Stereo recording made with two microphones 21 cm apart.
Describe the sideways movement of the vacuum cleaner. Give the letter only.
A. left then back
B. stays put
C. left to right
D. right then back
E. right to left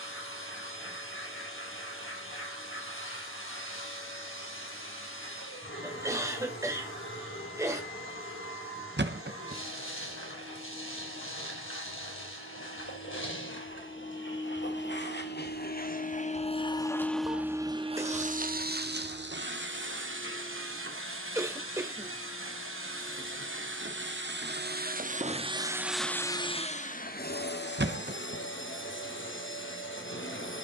D.